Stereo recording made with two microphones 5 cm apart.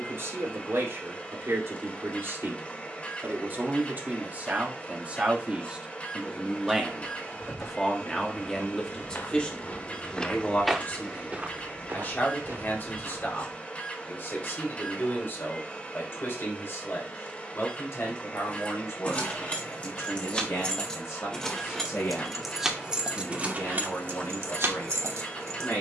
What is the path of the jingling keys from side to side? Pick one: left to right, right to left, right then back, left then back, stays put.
left to right.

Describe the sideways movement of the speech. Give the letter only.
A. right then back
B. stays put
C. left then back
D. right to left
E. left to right
D.